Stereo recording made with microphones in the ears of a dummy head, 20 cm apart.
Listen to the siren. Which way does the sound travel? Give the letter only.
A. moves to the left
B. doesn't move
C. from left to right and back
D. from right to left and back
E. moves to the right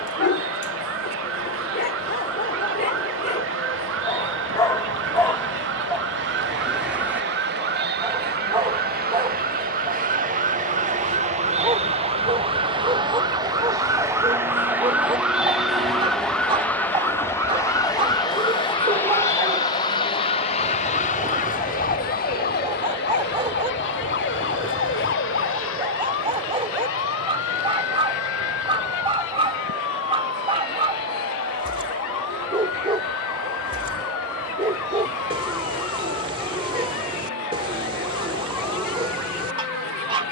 A.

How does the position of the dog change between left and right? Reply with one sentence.
In this clip you hear the dog move to the right.